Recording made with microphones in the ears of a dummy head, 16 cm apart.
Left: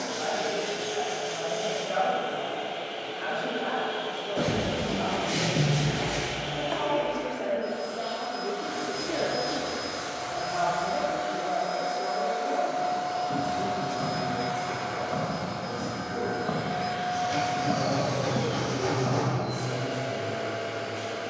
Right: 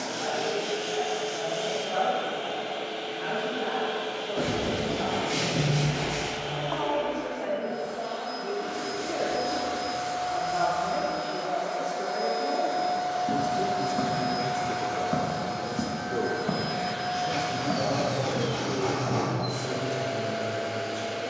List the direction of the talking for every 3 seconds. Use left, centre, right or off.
left, left, left, centre, right, right, right.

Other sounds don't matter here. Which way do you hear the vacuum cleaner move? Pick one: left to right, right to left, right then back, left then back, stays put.
left then back.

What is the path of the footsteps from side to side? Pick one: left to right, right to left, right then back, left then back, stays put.
right to left.